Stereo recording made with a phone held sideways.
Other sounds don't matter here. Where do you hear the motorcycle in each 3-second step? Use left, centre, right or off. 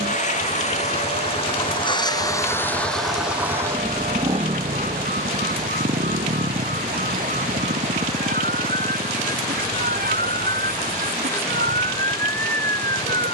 left, right, right, right, right.